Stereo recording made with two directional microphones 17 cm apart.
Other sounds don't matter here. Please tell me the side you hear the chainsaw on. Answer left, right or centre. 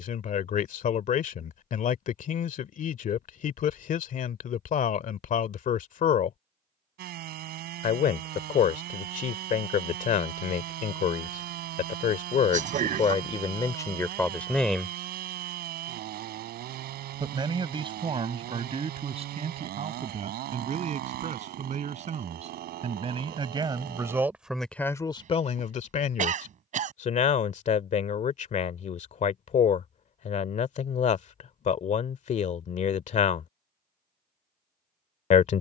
right.